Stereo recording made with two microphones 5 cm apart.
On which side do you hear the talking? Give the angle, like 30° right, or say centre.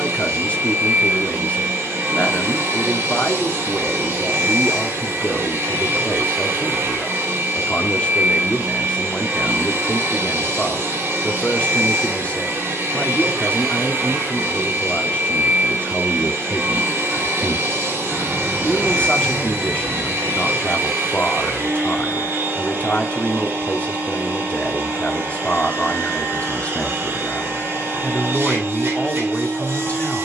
30° left.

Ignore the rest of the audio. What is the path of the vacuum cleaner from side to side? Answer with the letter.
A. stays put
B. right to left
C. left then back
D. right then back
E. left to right
A.